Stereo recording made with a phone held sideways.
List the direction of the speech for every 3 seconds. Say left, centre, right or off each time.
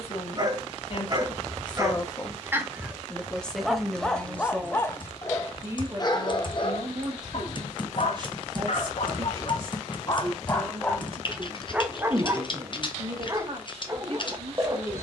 left, centre, right, right, right.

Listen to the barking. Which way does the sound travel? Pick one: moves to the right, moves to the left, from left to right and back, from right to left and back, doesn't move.
from right to left and back.